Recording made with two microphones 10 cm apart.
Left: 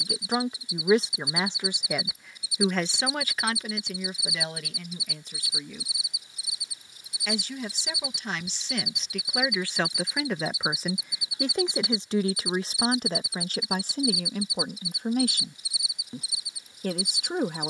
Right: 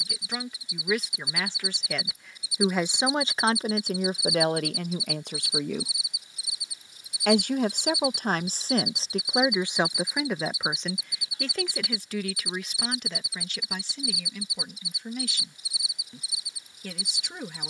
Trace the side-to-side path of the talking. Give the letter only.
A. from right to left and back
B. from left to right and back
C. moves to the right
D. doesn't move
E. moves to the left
B.